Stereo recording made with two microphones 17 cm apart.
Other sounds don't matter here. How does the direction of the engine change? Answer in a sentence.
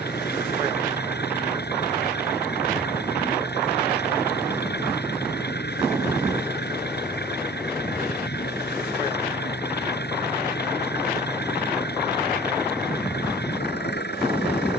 You can hear the engine stay in one place.